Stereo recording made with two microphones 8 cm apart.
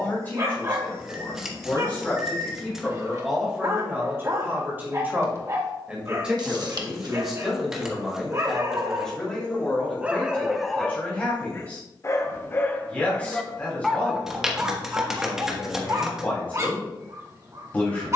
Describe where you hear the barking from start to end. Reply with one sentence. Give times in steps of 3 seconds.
You can hear the barking on the right from 0 s, in the centre from 9 s and on the right from 15 s.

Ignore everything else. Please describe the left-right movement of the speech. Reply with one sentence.
In this clip you hear the speech go right and come back.